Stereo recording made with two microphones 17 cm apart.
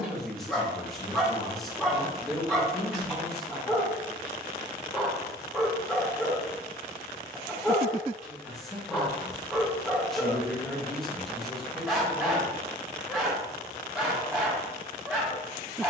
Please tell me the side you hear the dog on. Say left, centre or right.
centre.